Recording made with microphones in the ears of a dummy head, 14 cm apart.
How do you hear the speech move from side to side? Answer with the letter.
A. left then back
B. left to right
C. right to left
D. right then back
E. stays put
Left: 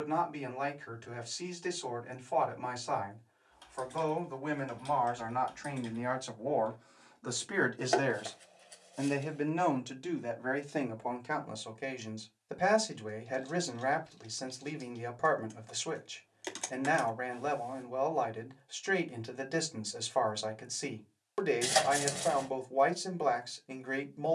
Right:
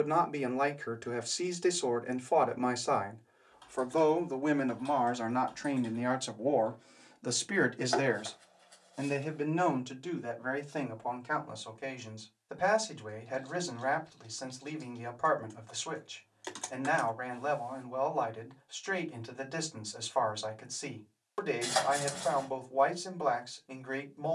C.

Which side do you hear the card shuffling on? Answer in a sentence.
You can hear the card shuffling on the left.